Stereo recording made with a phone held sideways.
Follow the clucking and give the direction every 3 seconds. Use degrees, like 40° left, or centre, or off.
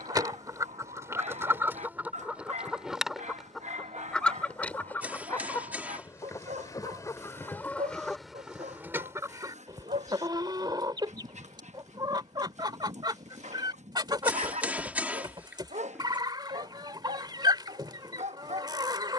20° right, 10° left, 10° left, 30° right, 30° right, 30° right, 30° right.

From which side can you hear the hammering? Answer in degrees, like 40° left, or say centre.
10° right.